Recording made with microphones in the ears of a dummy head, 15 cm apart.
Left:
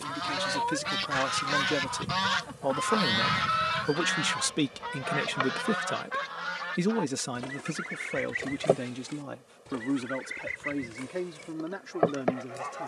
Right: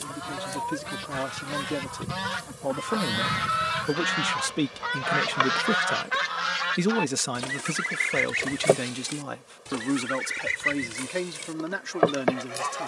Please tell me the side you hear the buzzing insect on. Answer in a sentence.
In this clip you hear the buzzing insect on the right.